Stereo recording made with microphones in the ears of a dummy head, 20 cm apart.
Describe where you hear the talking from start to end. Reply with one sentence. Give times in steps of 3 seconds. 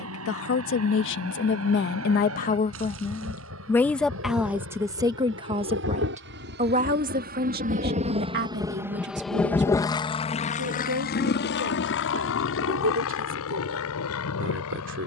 You can hear the talking on the left from 0 s, in the centre from 3 s and on the right from 6 s.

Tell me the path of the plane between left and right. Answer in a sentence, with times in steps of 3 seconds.
You can hear the plane on the right from 0 s and on the left from 9 s.